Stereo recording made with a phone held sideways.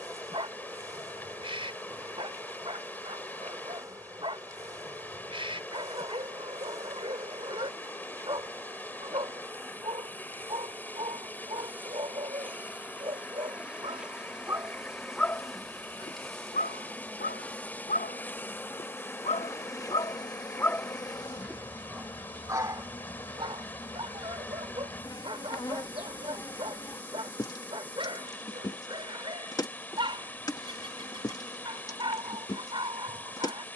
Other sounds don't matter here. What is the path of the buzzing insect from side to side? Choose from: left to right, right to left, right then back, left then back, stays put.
right to left.